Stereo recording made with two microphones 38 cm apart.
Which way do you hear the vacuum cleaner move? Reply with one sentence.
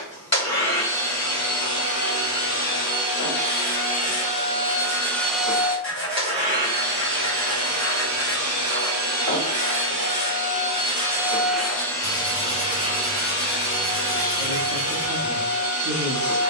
In this clip you hear the vacuum cleaner move from left to right and back again.